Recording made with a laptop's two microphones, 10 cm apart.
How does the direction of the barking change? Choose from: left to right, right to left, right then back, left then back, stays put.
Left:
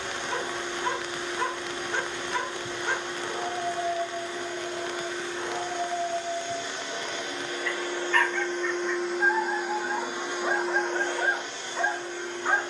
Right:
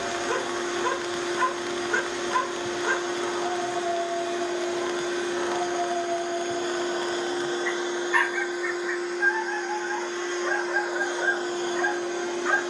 right to left.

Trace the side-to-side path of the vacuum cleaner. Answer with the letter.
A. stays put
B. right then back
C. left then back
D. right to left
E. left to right
C.